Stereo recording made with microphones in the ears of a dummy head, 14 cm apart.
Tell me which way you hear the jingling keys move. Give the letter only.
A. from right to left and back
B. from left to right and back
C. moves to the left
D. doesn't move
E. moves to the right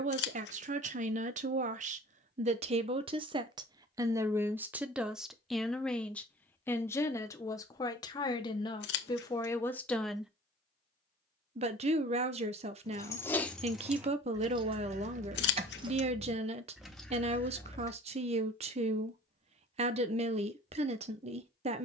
B.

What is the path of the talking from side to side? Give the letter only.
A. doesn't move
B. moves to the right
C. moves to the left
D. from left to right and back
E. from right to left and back
E.